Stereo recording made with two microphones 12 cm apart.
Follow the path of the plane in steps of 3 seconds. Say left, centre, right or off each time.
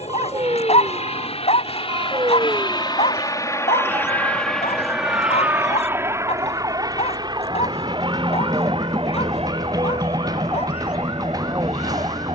left, centre, right, right.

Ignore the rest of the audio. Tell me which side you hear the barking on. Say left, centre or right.
left.